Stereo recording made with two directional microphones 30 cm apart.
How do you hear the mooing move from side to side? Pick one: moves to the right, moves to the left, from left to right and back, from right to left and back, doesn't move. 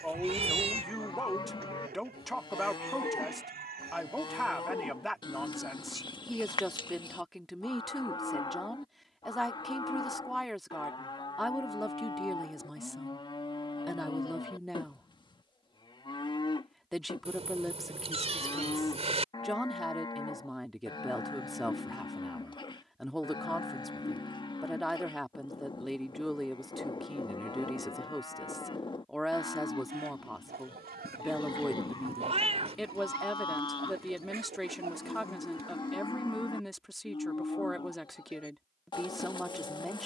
doesn't move.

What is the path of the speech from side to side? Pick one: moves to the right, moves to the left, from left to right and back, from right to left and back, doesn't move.
doesn't move.